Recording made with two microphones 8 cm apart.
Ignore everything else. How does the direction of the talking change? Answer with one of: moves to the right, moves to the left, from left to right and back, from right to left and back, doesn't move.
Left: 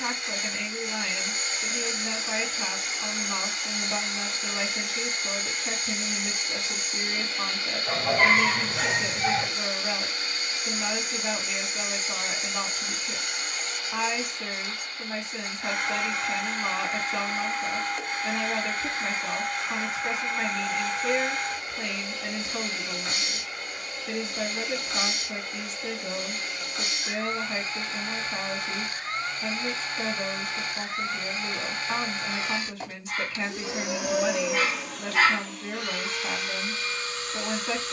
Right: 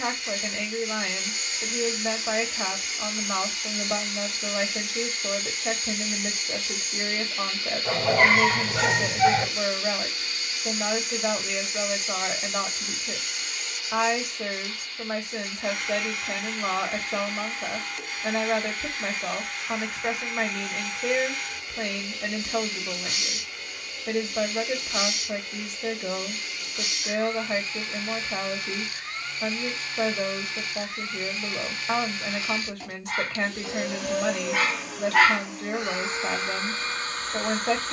doesn't move.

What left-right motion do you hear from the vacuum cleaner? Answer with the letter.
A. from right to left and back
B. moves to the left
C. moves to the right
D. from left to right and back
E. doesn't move
C.